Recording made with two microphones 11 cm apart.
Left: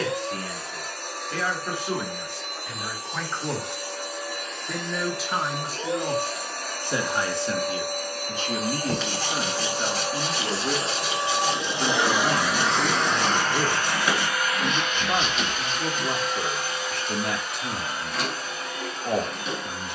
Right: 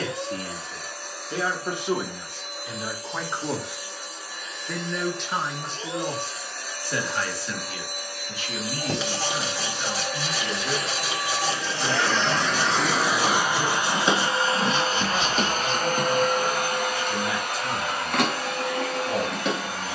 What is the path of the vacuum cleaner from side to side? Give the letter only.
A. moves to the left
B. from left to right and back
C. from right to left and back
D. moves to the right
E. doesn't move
D.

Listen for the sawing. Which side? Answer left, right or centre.
centre.